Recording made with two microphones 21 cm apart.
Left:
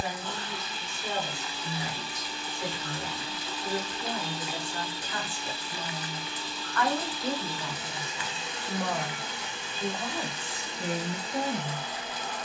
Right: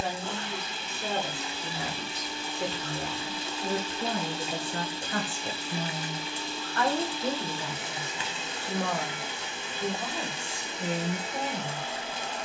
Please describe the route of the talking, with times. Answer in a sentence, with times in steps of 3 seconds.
In this clip you hear the talking on the right from 0 s and in the centre from 9 s.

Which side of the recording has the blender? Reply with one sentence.
You can hear the blender on the right.